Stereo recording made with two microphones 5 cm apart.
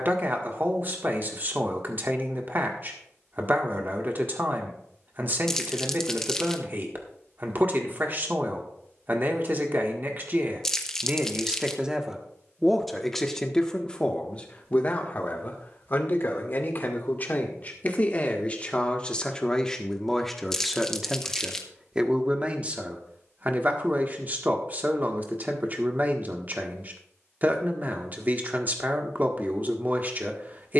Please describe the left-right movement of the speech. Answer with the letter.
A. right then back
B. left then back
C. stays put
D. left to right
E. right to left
B.